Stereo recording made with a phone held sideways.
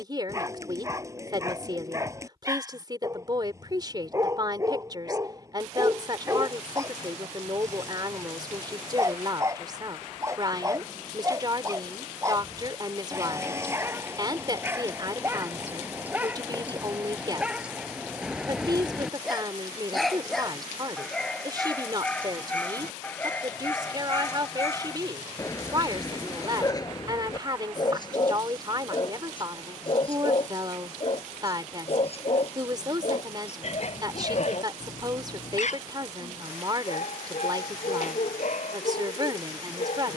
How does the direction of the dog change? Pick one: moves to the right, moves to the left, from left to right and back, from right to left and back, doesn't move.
moves to the left.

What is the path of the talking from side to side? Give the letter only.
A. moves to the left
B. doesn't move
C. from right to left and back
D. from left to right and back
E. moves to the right
B.